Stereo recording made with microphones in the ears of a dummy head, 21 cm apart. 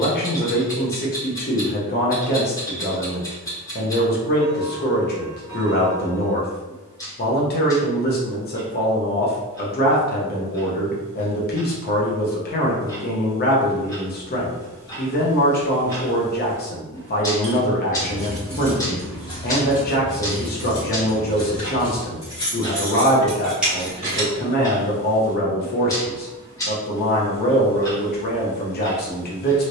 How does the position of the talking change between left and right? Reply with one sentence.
In this clip you hear the talking stay in one place.